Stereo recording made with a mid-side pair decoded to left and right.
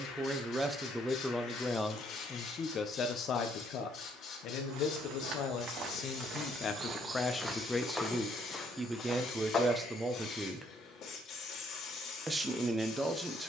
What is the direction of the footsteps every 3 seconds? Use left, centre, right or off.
off, right, centre, left, off.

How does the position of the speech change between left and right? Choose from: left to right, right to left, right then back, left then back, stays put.
left then back.